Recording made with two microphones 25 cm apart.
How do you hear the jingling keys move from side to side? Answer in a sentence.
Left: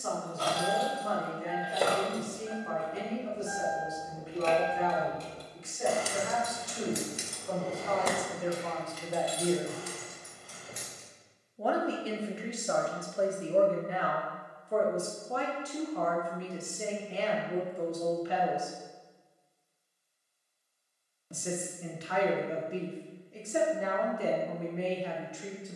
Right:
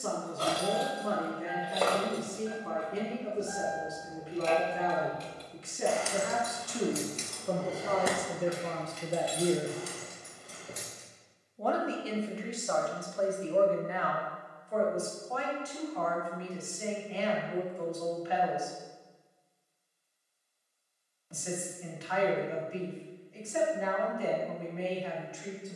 In this clip you hear the jingling keys go left and come back.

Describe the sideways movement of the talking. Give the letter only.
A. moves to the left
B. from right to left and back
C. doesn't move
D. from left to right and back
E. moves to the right
A.